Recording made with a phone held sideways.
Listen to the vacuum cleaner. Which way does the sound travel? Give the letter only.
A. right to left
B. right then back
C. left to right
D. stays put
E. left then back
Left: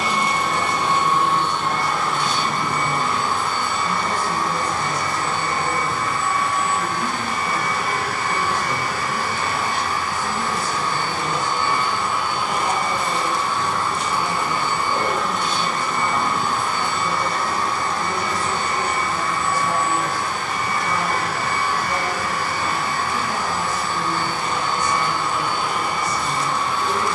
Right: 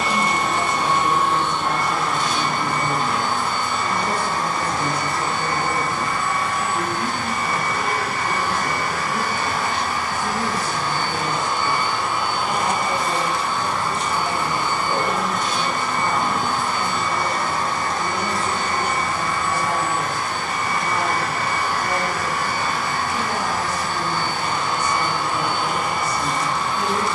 D.